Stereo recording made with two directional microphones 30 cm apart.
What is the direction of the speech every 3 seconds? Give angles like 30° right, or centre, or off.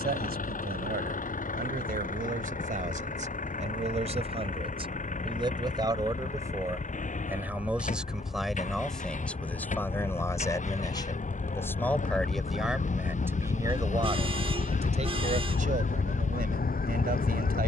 30° right, 20° right, centre, 10° left, 10° right, 30° right.